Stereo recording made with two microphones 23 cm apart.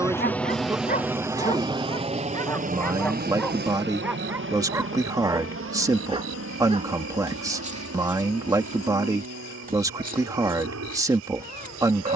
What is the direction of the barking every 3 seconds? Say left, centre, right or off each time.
left, centre, right, right.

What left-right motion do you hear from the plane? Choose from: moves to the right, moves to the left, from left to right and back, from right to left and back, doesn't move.
moves to the right.